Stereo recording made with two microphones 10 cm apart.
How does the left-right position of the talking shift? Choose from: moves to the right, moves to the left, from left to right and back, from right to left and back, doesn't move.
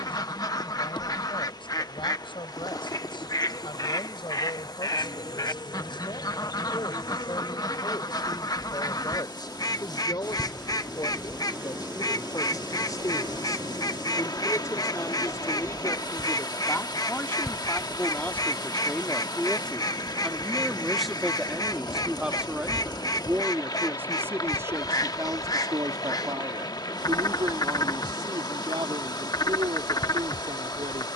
moves to the right.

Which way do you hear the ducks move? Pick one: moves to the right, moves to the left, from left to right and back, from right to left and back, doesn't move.
doesn't move.